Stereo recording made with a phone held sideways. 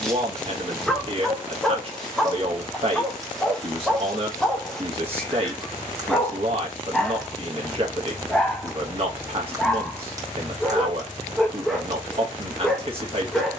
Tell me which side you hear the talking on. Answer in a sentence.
You can hear the talking on the right.